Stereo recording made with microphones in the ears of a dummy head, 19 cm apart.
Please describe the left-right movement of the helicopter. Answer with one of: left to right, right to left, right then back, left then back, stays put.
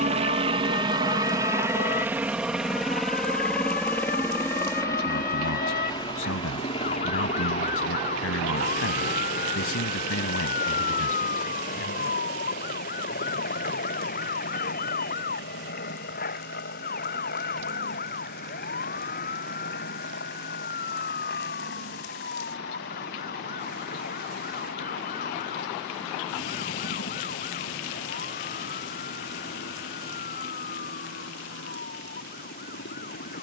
right to left.